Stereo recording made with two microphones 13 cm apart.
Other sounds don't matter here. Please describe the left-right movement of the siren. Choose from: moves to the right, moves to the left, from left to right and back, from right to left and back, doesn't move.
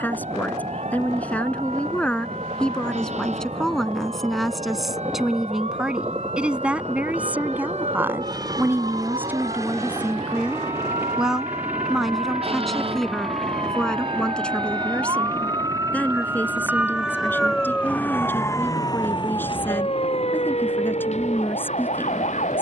moves to the left.